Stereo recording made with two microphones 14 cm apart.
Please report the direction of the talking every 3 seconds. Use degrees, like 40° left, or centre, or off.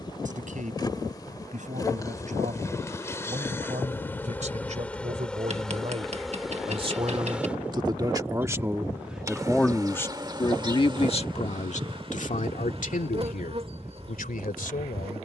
60° right, 50° right, 30° right, 30° left, 70° left.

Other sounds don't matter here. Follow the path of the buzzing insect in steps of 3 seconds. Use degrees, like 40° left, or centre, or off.
30° left, 10° left, 10° right, 30° right, 40° right.